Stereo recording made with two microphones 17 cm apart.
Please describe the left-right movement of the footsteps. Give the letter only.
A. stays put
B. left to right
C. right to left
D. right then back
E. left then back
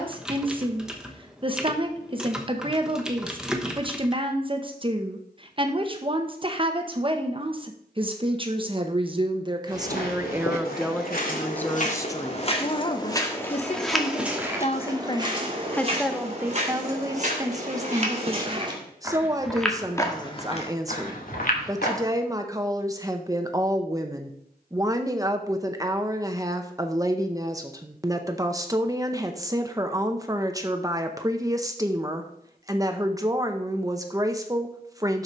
D.